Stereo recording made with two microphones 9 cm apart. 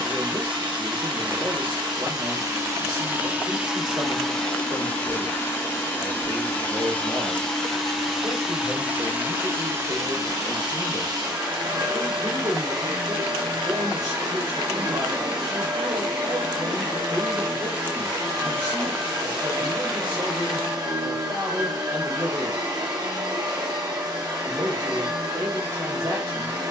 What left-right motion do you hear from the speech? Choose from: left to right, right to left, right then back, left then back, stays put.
stays put.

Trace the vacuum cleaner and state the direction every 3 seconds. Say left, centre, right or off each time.
right, centre, centre, right, right, right, right, right, right.